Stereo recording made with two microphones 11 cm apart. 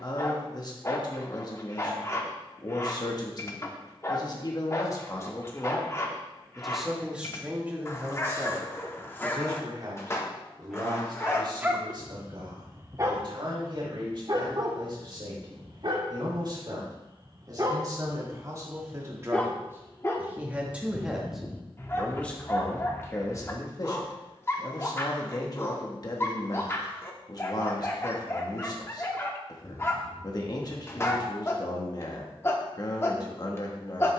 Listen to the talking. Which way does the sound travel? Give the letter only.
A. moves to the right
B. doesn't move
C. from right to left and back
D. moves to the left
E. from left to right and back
E.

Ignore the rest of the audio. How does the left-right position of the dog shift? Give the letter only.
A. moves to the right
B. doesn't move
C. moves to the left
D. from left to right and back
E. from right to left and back
D.